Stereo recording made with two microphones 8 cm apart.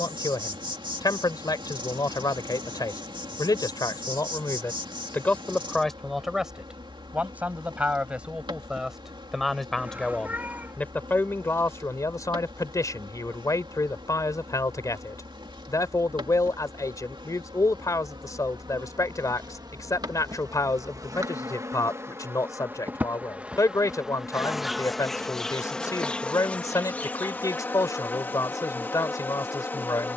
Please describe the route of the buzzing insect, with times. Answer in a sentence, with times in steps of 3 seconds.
You can hear the buzzing insect on the right from 0 s, in the centre from 24 s and on the left from 27 s.